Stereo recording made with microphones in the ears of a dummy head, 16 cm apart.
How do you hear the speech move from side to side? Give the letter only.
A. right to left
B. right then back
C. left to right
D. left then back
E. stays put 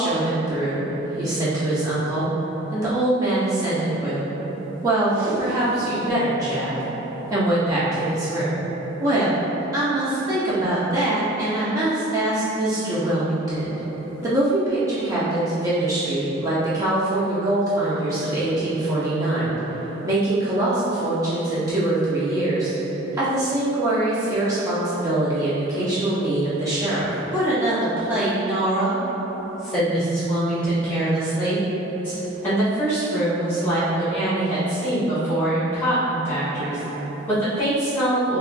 A.